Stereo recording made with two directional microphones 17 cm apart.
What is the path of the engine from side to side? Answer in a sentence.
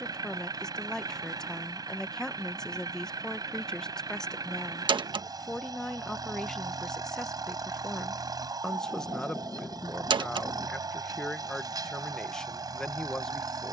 In this clip you hear the engine stay put.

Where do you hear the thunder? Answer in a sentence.
You can hear the thunder in the centre.